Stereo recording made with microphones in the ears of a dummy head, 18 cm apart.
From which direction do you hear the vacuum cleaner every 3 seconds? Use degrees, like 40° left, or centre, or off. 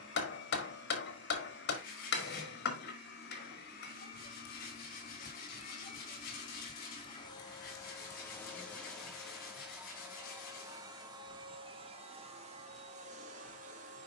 60° left, 50° left, 20° left, 10° right, 40° right.